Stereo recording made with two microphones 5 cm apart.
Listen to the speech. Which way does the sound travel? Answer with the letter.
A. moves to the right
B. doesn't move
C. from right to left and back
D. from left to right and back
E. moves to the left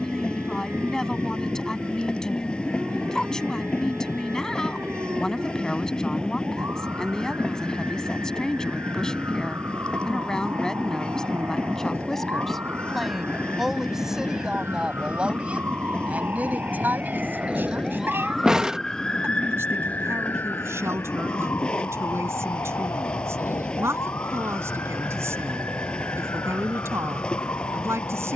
A.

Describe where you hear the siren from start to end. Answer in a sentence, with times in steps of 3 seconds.
In this clip you hear the siren on the right from 0 s and on the left from 18 s.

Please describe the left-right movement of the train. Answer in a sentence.
You can hear the train stay put.